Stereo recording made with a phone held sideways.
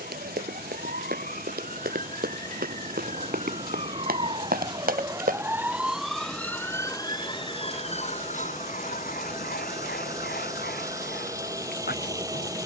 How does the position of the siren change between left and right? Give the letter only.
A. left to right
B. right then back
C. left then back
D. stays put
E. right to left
E.